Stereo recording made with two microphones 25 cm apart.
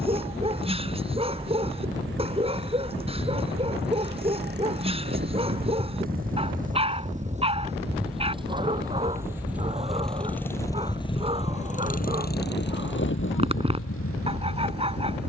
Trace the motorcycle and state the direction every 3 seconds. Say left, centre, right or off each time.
right, right, right, centre, left.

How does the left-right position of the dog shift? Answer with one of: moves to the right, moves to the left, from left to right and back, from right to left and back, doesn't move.
doesn't move.